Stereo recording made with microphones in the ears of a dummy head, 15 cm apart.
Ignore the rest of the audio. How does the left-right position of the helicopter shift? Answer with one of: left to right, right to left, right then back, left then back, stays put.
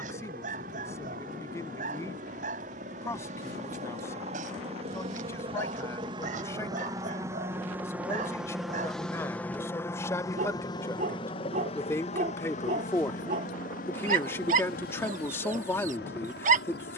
right to left.